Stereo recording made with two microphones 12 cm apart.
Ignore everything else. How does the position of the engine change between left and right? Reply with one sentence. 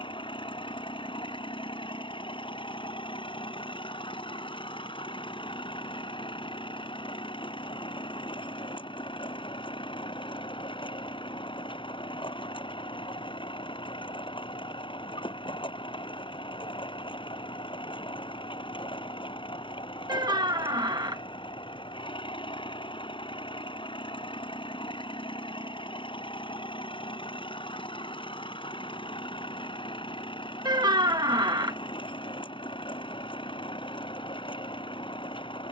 In this clip you hear the engine stay in one place.